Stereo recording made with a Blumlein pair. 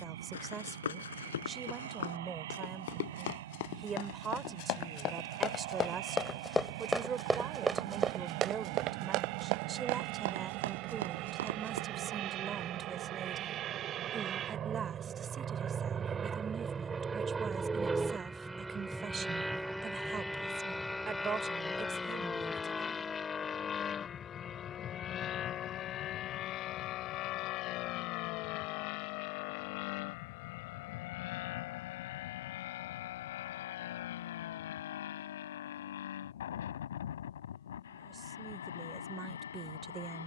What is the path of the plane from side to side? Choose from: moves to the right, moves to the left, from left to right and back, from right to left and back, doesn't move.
moves to the left.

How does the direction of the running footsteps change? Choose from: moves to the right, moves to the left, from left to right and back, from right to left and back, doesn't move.
moves to the right.